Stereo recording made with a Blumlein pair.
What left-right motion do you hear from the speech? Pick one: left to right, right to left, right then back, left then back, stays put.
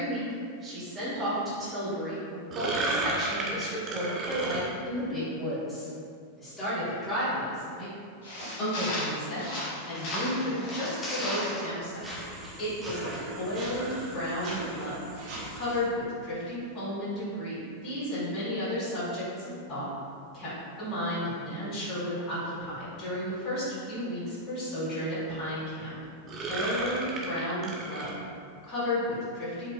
right to left.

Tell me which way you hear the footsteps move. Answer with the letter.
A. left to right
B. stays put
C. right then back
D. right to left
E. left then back
A.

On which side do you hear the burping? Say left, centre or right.
right.